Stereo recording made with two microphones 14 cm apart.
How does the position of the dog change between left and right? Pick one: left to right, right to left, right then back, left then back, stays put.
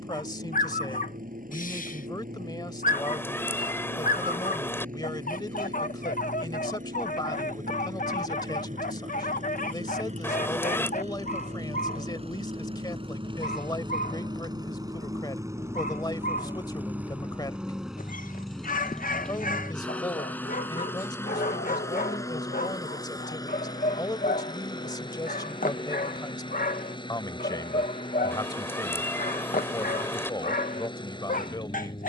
stays put.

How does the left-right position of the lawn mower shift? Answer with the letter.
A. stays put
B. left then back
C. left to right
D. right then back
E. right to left
E.